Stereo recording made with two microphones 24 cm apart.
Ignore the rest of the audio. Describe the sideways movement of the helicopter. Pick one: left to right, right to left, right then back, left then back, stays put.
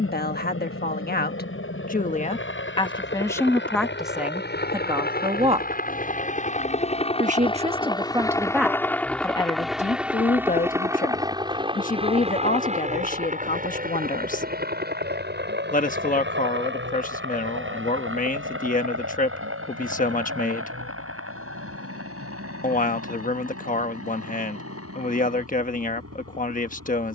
left to right.